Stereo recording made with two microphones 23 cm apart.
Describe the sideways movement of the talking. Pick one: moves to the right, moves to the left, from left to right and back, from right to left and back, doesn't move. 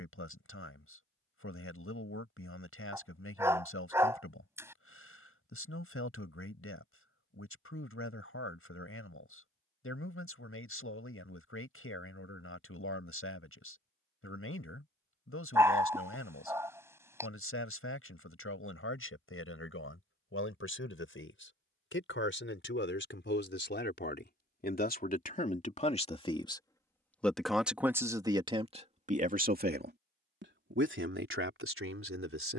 moves to the right.